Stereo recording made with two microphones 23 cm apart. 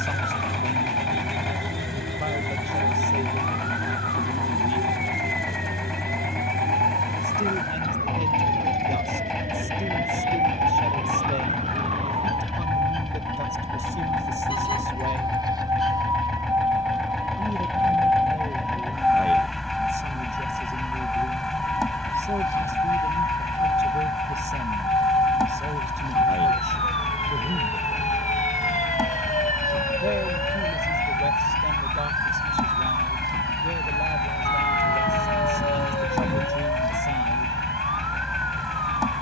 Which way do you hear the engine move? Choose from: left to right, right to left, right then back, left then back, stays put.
stays put.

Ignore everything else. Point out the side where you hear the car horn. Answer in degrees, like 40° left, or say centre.
20° left.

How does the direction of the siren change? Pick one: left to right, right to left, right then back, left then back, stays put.
right to left.